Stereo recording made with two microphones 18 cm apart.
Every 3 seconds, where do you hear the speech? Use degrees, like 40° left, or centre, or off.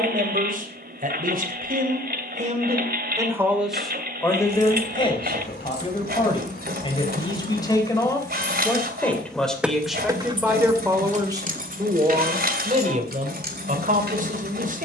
50° right, 20° left, 20° left, 10° right, 50° right.